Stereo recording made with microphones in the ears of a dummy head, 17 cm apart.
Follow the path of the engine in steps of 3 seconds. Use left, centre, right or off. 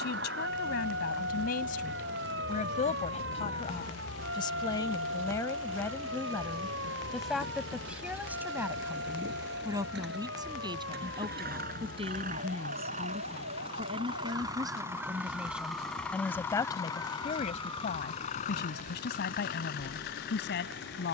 right, right, right, right, right, centre, left.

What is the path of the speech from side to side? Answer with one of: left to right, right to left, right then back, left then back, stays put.
right then back.